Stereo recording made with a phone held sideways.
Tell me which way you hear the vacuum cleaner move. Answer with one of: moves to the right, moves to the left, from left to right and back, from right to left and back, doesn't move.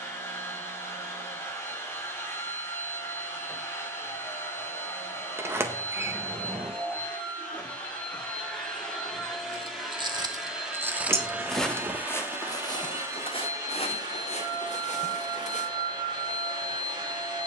moves to the right.